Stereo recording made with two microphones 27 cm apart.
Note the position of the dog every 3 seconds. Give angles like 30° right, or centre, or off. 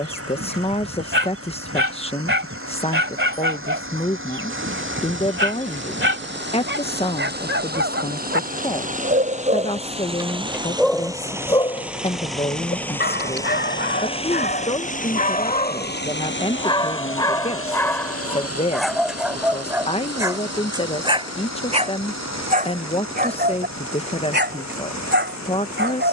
50° right, 50° right, 50° right, 10° right, 40° left, 20° left, centre, 30° right, 40° right.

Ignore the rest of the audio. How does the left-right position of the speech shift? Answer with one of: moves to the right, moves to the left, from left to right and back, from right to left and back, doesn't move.
doesn't move.